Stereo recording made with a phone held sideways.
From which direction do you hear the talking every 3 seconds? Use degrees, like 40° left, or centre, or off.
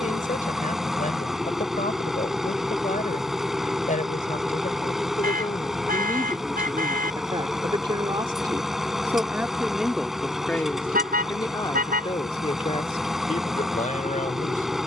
60° left, 50° left, 20° right, 10° left, 50° left.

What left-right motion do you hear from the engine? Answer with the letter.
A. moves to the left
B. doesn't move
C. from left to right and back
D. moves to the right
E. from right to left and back
B.